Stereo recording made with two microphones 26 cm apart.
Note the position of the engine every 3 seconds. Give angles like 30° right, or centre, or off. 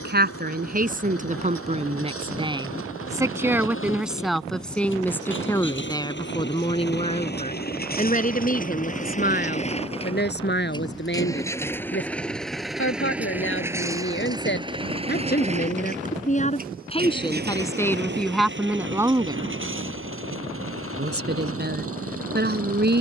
60° left, 50° left, 40° left, 20° left, 10° right, 30° right, 50° right, 60° right.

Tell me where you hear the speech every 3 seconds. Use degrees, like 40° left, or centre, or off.
30° right, centre, 30° left, 40° left, 50° left, 30° left, 10° right, 40° right.